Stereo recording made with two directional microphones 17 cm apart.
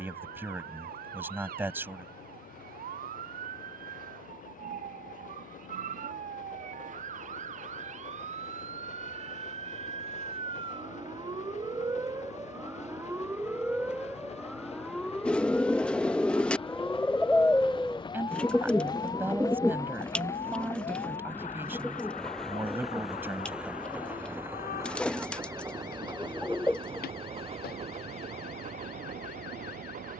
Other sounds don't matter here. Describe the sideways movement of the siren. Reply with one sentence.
You can hear the siren move from right to left.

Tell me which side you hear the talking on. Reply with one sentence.
In this clip you hear the talking in the centre.